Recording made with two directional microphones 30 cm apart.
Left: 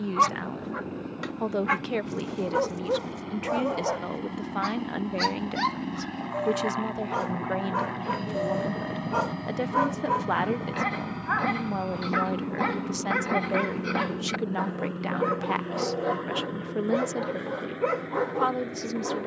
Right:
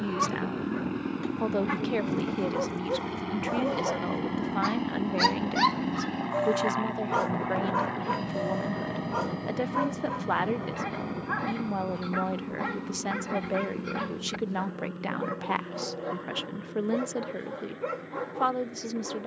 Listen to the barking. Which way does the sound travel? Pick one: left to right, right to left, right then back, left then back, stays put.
right then back.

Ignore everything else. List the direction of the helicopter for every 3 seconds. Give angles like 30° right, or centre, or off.
50° right, 30° right, centre, 20° left, 40° left, 50° left, 50° left.